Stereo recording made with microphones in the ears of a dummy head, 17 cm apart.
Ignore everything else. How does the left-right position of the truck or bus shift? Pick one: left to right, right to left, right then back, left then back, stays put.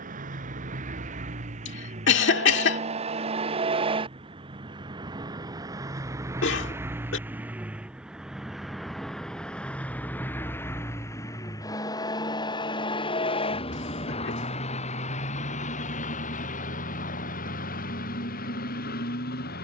right to left.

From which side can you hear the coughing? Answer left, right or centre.
left.